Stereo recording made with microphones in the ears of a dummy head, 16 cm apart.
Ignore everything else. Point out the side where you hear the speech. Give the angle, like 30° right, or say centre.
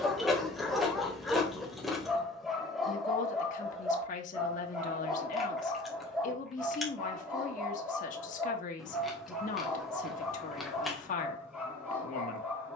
40° left.